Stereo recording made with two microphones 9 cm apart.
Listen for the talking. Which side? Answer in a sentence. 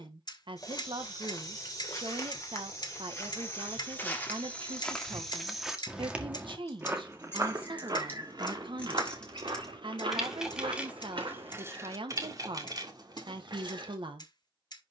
You can hear the talking on the right.